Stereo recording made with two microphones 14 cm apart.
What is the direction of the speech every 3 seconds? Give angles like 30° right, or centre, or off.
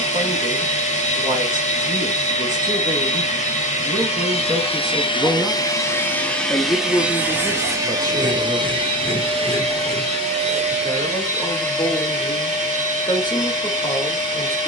60° right, 40° right, 20° left, 30° left, 30° left.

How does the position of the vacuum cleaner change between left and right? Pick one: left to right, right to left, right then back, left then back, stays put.
left to right.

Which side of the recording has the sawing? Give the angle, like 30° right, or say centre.
60° right.